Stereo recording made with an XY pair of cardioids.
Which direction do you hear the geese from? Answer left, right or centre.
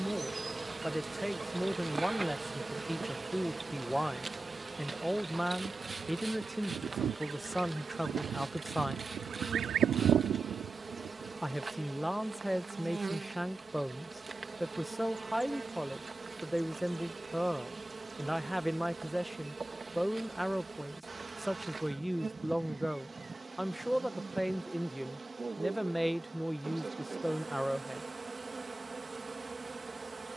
right.